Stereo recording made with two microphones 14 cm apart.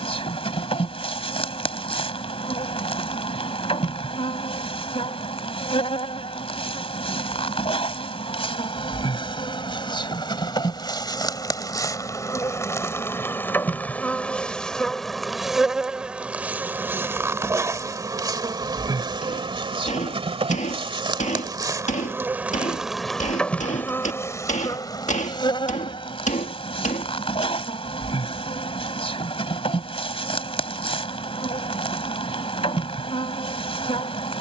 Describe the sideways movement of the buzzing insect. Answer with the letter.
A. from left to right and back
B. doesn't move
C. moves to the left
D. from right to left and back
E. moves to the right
A.